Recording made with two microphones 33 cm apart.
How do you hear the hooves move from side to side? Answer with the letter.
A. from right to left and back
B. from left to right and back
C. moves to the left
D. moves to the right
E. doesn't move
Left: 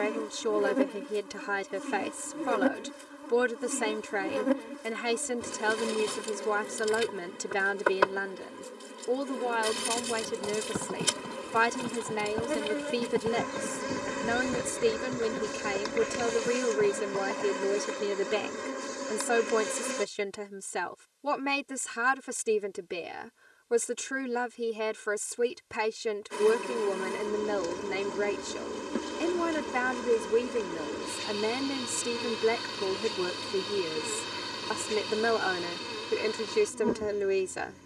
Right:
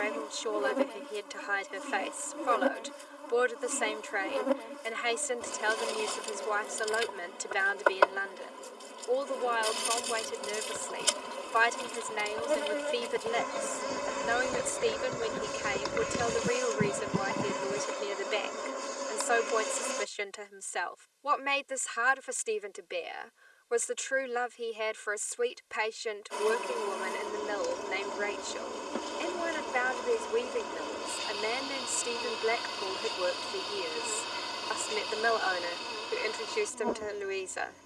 D.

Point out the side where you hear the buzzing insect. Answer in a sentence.
In this clip you hear the buzzing insect on the left.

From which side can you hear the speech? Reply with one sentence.
You can hear the speech on the left.